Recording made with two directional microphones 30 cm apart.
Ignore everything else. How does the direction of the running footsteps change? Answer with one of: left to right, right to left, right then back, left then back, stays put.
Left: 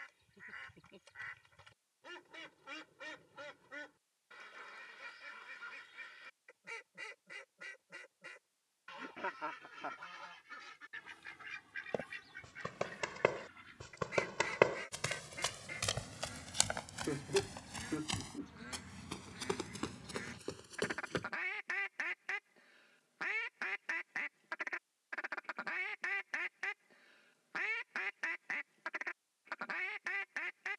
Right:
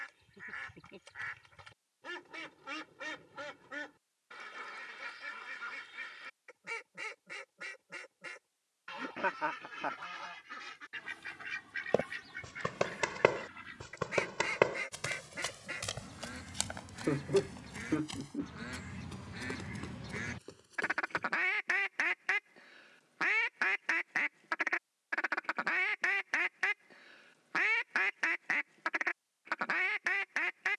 right to left.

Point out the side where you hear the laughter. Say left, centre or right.
right.